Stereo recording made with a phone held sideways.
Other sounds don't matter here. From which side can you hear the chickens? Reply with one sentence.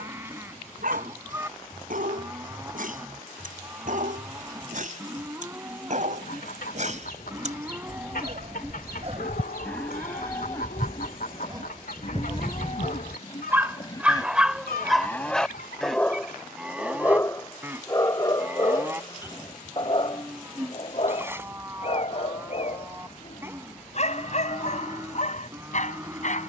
In this clip you hear the chickens on the left.